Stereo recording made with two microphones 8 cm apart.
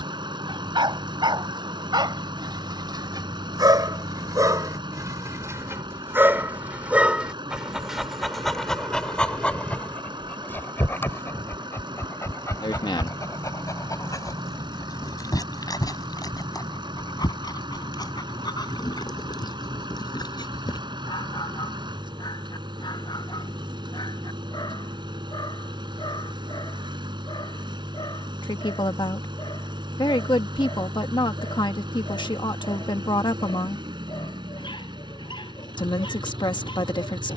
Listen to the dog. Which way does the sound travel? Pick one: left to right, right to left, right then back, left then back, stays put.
right to left.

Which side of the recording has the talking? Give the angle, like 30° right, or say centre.
70° left.